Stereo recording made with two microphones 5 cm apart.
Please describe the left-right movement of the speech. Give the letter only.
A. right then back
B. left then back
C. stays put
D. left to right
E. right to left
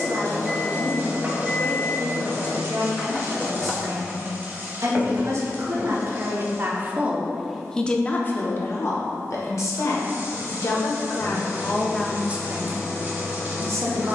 B.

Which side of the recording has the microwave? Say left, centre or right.
centre.